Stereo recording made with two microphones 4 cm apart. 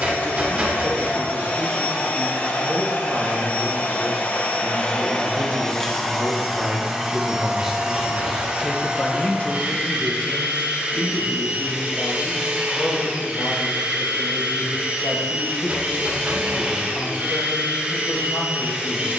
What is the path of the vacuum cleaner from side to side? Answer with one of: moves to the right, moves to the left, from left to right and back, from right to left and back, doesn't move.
moves to the right.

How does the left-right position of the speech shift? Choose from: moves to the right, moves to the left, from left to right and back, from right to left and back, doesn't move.
moves to the left.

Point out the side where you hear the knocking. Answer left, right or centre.
right.